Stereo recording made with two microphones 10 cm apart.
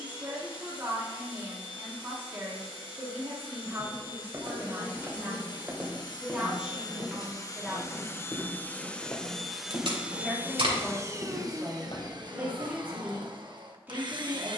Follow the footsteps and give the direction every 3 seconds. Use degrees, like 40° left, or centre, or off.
off, 30° right, 10° left, 50° left, 70° left.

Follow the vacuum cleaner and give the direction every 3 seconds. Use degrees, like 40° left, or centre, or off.
60° left, 50° left, 30° left, 20° right, 50° right.